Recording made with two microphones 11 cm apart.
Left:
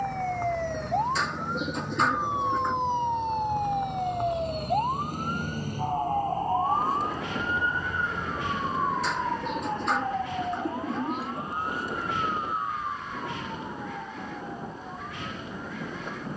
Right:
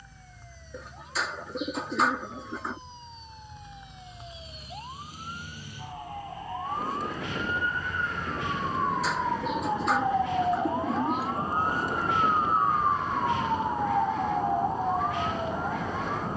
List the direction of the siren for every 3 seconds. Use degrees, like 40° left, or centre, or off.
80° left, 60° left, 30° left, 20° right, 40° right, 50° right.